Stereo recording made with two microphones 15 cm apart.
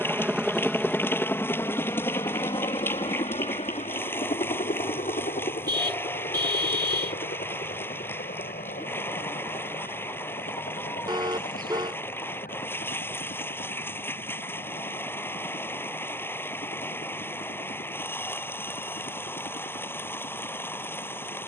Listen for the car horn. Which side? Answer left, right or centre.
right.